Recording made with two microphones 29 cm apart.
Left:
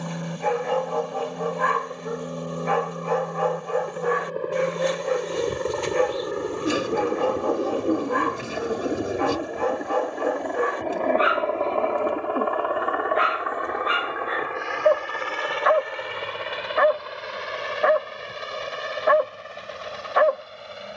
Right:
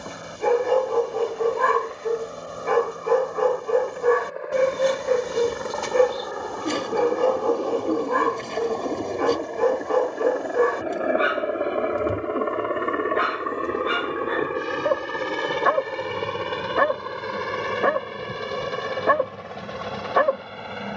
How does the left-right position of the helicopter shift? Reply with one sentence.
In this clip you hear the helicopter move from left to right.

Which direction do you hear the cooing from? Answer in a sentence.
You can hear the cooing in the centre.